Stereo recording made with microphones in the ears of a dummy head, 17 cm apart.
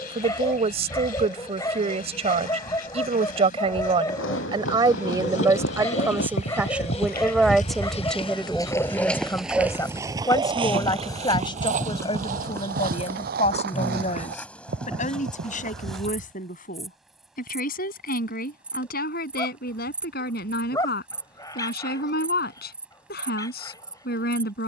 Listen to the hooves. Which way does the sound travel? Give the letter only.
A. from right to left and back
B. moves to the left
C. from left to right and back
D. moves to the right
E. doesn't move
D.